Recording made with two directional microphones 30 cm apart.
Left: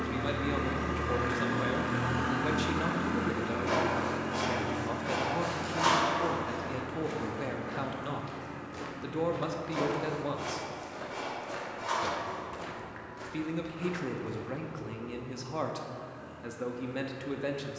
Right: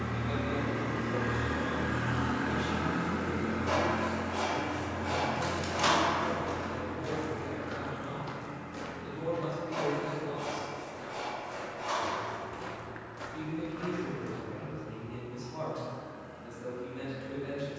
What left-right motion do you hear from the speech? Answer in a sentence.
You can hear the speech stay put.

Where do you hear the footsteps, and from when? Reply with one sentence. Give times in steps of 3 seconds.
You can hear the footsteps not at all from 0 s, on the right from 3 s, on the left from 9 s, in the centre from 12 s and not at all from 15 s.